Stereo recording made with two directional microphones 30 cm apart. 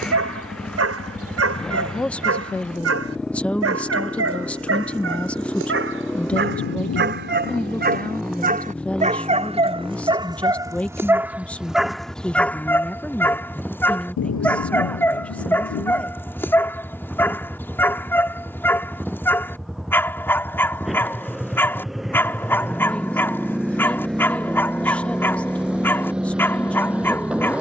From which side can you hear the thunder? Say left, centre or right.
left.